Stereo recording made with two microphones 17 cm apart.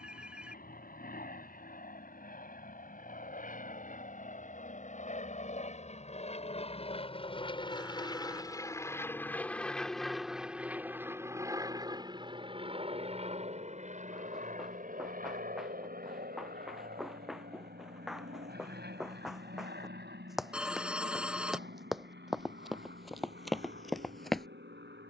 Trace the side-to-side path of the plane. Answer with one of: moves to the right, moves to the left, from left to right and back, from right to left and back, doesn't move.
moves to the right.